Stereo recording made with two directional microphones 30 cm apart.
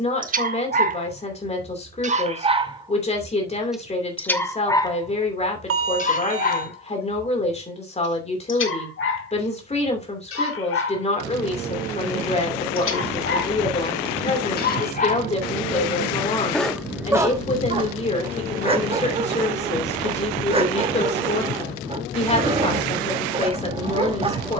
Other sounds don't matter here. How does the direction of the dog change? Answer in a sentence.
In this clip you hear the dog go left and come back.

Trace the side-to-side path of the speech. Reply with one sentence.
You can hear the speech stay put.